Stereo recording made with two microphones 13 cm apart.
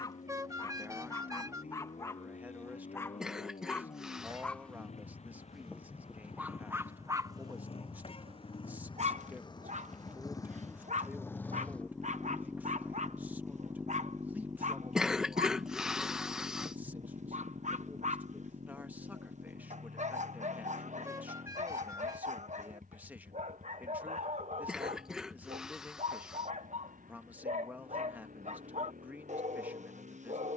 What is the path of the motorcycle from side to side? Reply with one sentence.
You can hear the motorcycle go from the left side to the right.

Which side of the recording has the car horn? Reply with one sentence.
You can hear the car horn on the right.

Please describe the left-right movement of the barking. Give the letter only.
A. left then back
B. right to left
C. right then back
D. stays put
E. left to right
E.